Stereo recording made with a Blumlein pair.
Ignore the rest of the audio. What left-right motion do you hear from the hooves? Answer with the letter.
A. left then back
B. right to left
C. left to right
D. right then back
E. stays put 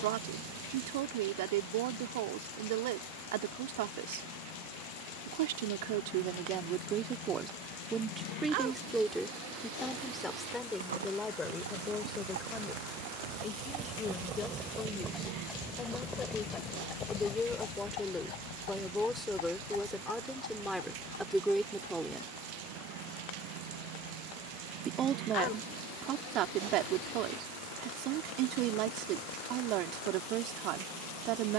B.